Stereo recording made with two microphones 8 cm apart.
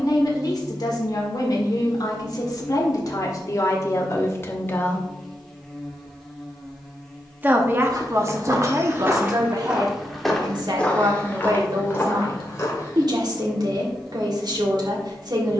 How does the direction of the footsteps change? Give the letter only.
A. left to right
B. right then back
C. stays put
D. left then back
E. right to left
E.